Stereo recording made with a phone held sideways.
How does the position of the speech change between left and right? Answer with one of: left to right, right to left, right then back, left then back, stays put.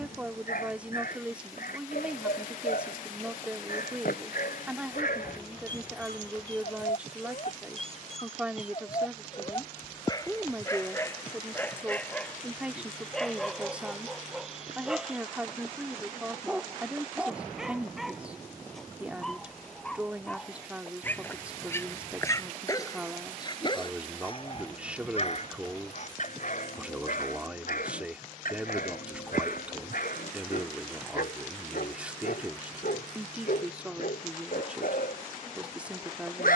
stays put.